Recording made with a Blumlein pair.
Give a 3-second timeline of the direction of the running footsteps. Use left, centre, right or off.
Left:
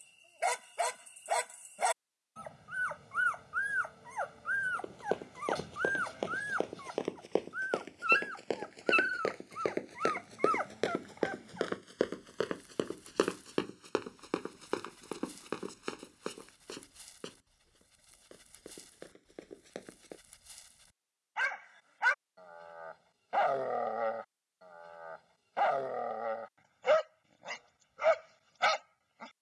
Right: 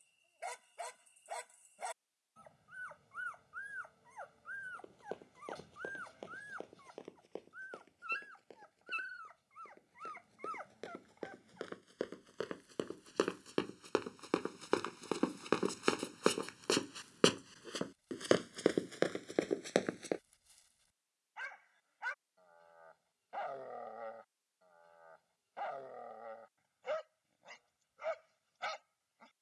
off, left, left, left, centre, right, right, off, off, off.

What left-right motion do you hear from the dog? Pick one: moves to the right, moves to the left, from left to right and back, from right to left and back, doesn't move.
doesn't move.